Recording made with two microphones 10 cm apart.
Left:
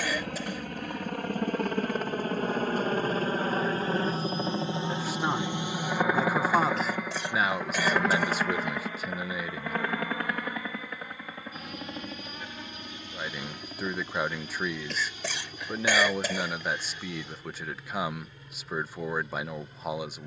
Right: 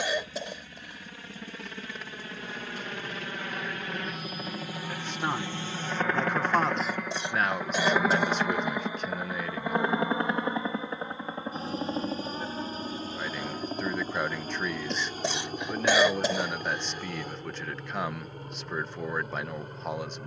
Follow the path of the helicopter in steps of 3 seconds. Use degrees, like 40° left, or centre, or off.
50° left, 30° left, centre, 20° right, 40° right, 40° right, 50° right.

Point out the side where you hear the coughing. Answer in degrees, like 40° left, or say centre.
20° right.